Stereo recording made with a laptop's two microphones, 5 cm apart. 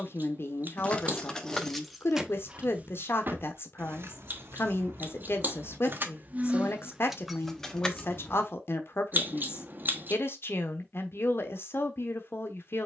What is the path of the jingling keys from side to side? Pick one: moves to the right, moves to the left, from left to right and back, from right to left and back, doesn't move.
from left to right and back.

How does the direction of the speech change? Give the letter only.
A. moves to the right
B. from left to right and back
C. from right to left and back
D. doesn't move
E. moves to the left
D.